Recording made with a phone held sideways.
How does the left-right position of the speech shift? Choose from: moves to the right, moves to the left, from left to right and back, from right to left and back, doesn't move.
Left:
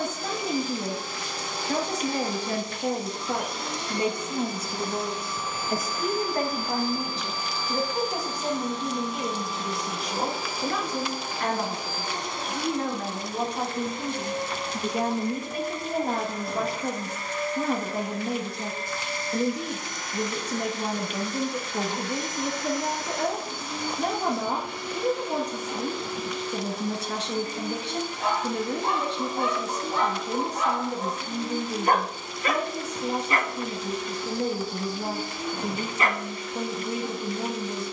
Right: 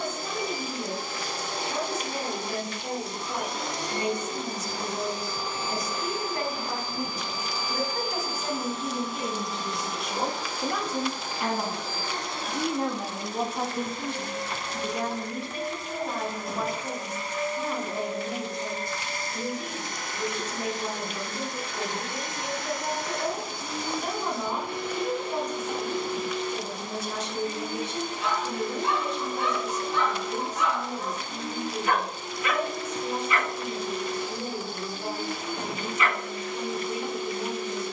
from left to right and back.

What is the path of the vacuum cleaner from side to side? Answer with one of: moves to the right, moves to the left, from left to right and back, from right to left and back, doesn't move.
from right to left and back.